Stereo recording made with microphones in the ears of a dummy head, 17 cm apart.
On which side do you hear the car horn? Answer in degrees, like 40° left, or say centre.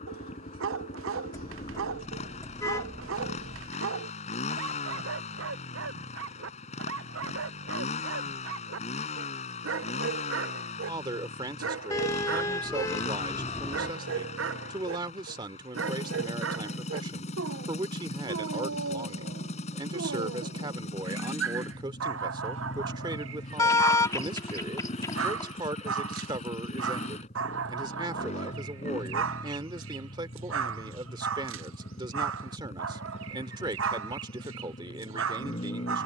20° left.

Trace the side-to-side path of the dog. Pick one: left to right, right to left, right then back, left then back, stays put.
stays put.